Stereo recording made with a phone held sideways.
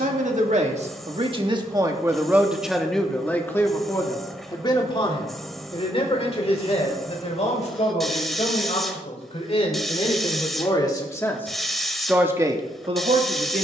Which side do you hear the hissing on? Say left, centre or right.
centre.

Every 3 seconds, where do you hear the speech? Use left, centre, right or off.
right, left, left, left, right.